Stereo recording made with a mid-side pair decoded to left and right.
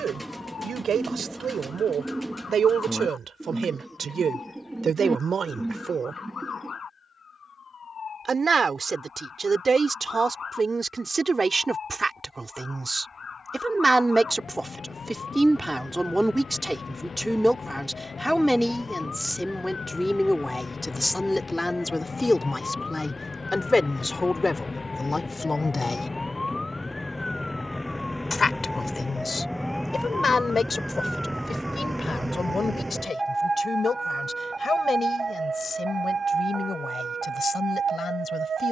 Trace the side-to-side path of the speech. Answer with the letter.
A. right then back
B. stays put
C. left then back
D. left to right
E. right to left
E.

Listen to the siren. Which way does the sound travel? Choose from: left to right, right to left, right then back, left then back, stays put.
left to right.